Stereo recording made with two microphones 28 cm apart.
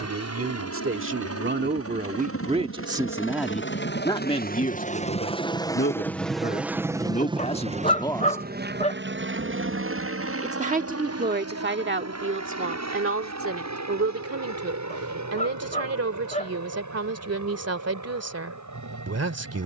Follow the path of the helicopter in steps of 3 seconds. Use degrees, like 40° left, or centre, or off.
60° left, 30° left, 20° right, 50° right, 60° right, 70° right, 70° right.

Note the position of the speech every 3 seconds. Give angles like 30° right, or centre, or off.
40° right, 20° left, 20° left, 30° right, 50° right, 60° right, 60° right.